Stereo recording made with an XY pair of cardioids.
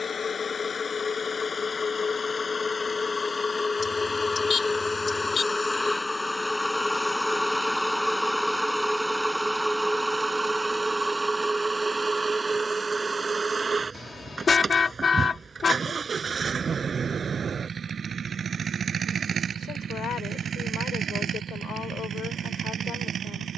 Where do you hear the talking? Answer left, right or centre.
left.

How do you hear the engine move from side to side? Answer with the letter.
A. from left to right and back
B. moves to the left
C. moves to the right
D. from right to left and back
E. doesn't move
C.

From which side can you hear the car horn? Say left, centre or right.
left.